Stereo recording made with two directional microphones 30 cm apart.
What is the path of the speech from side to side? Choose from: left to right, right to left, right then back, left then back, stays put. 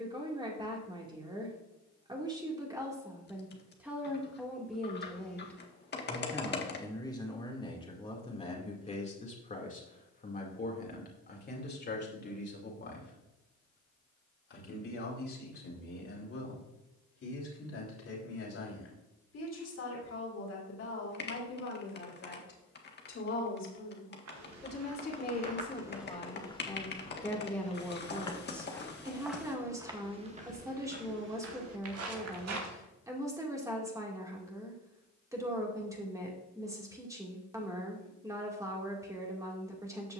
left then back.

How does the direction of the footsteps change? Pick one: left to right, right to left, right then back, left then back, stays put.
left then back.